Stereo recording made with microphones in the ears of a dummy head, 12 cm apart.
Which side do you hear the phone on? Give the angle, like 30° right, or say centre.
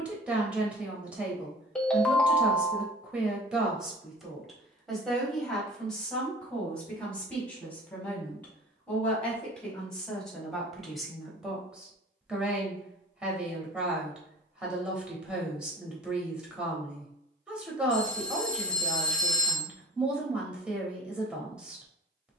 10° left.